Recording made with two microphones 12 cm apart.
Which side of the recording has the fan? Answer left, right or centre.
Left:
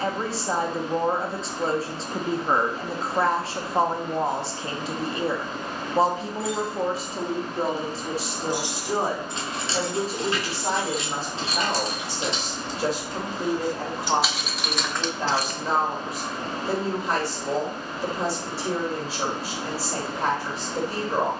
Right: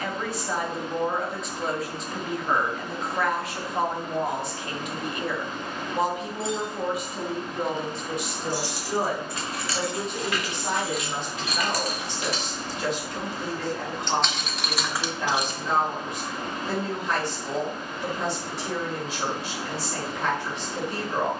left.